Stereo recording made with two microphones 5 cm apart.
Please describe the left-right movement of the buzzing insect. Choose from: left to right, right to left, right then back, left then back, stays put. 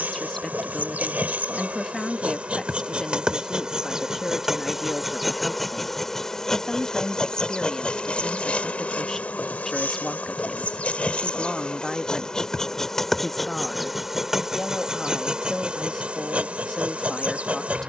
left then back.